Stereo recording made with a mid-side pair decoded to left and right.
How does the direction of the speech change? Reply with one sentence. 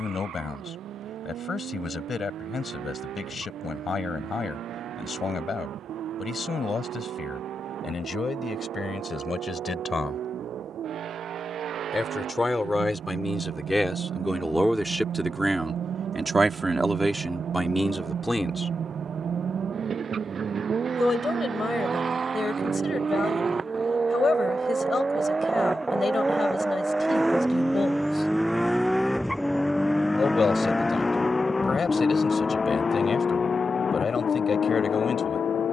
In this clip you hear the speech move from left to right and back again.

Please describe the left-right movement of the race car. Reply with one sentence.
You can hear the race car move from right to left.